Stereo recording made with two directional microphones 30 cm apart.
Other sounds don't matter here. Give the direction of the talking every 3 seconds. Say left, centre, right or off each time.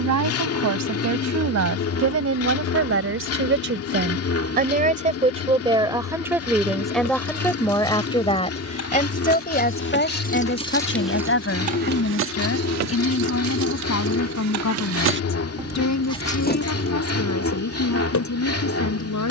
right, right, centre, left, left, left, left.